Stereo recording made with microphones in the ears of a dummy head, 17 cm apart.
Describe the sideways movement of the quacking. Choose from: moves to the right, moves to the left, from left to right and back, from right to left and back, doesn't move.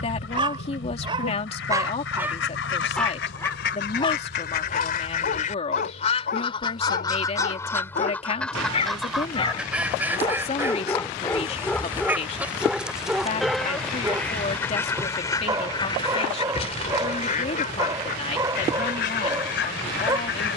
from left to right and back.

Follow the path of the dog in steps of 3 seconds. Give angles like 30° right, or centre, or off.
20° right, 40° left, 40° left, 20° left, 10° right, 20° right, 20° right.